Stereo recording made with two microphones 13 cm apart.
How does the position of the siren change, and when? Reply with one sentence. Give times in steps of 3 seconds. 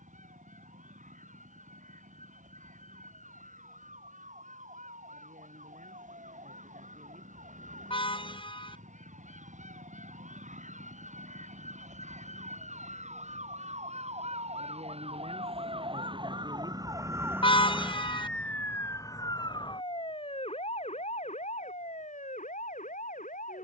You can hear the siren on the right from 0 s and on the left from 18 s.